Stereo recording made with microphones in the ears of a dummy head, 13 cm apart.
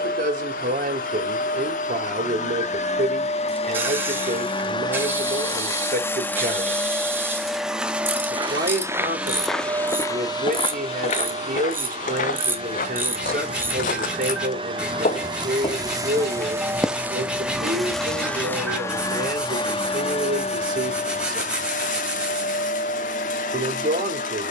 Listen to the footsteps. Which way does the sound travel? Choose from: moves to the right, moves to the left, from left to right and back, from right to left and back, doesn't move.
from right to left and back.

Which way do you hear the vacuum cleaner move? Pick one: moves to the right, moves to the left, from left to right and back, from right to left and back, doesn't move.
from left to right and back.